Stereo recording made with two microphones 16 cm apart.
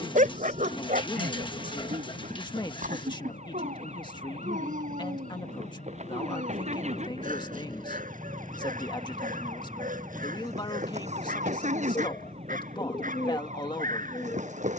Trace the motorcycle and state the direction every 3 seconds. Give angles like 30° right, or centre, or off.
70° left, 50° left, 20° left, 20° right, 40° right.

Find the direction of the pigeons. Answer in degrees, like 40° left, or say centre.
30° left.